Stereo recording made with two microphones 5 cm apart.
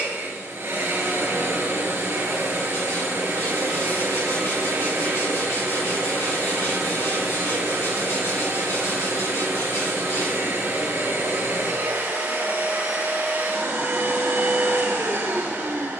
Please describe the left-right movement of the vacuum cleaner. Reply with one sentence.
In this clip you hear the vacuum cleaner stay in one place.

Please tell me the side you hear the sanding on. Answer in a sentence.
You can hear the sanding on the left.